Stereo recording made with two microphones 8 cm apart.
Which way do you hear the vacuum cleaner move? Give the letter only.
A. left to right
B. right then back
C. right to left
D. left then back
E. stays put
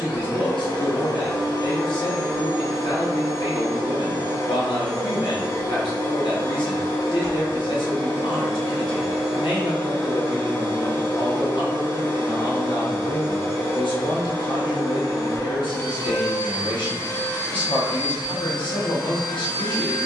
E.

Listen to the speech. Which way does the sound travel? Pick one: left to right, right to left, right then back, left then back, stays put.
stays put.